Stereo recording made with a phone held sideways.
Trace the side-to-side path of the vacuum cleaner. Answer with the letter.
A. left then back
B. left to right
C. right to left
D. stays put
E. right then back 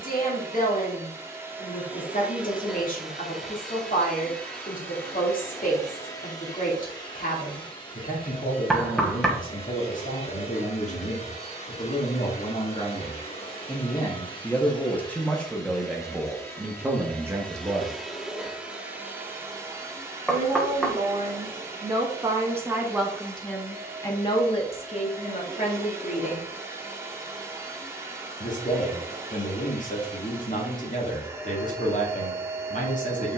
A.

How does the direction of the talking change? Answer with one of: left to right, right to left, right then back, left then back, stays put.
right then back.